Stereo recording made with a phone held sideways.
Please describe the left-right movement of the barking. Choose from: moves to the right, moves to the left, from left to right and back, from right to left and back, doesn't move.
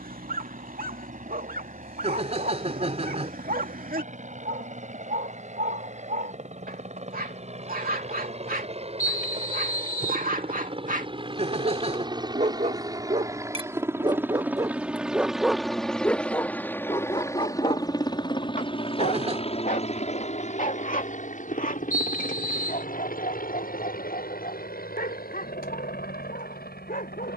moves to the left.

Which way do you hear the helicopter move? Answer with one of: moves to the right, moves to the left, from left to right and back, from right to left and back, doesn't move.
moves to the left.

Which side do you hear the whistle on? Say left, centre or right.
left.